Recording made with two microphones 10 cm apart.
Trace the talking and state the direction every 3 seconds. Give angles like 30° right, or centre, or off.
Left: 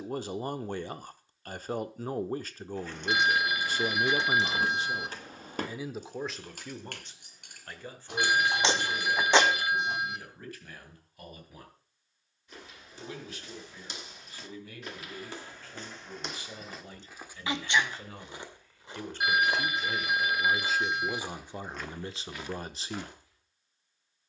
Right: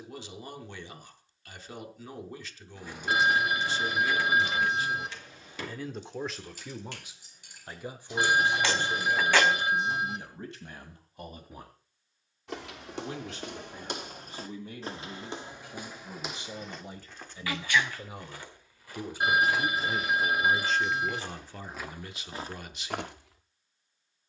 40° left, 30° left, 10° right, 20° right, 30° right, 20° right, 10° right, 30° left.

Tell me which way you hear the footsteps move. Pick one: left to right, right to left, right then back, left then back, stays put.
left then back.